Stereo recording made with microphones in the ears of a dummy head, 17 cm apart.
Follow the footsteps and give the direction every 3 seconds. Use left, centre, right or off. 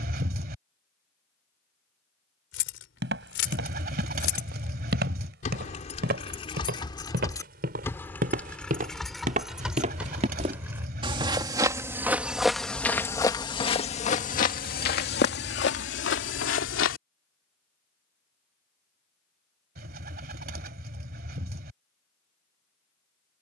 off, right, right, right, left, left, off, off.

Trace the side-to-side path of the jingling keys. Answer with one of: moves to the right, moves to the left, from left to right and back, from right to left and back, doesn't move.
moves to the right.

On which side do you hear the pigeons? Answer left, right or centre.
right.